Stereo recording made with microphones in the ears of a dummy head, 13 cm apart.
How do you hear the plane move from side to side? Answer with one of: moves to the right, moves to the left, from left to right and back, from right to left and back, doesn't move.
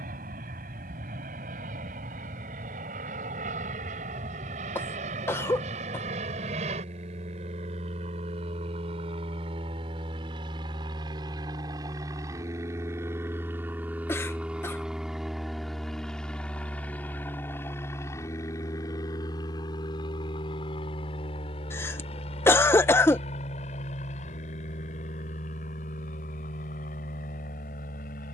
moves to the left.